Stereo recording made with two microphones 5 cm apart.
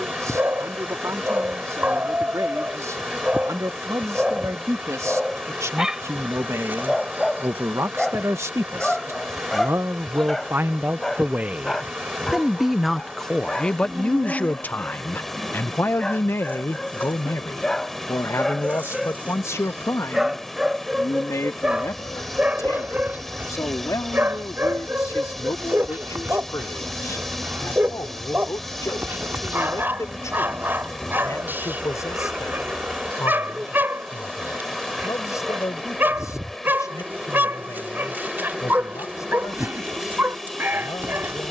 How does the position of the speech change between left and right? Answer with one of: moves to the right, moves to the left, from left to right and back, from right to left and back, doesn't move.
moves to the left.